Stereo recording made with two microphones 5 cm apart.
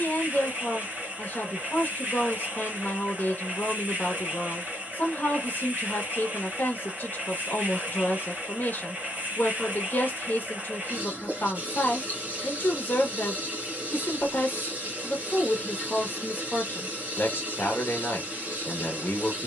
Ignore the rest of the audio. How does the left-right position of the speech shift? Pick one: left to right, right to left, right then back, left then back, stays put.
stays put.